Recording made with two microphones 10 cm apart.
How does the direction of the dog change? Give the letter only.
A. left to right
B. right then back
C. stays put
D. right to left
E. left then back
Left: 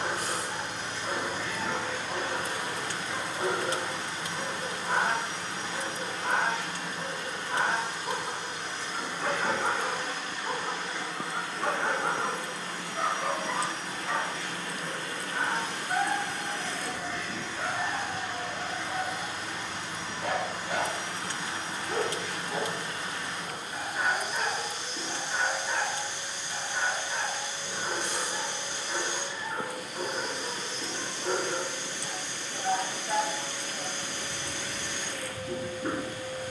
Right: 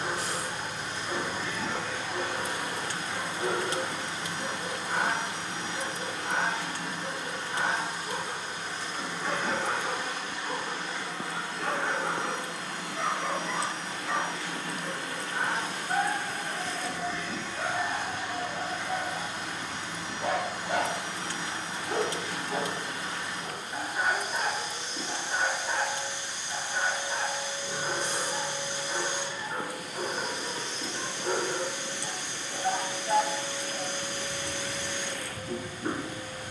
A.